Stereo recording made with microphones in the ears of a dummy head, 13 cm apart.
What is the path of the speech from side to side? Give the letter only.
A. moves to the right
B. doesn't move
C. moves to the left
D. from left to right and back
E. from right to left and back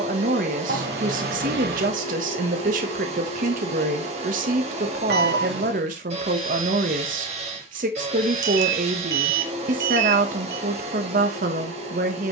B.